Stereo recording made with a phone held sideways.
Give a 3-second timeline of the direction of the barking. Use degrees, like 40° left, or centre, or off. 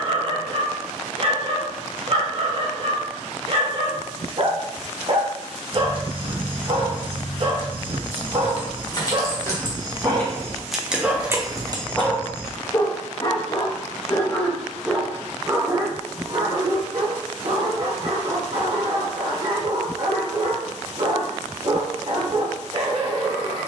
40° right, 40° right, 40° right, 20° right, 20° left, 30° right, 40° right, 40° right.